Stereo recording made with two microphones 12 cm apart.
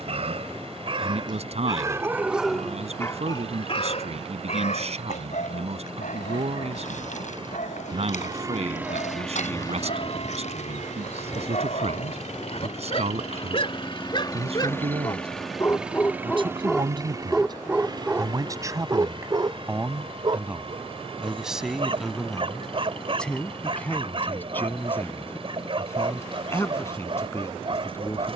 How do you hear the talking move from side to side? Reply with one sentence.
In this clip you hear the talking travel towards the left.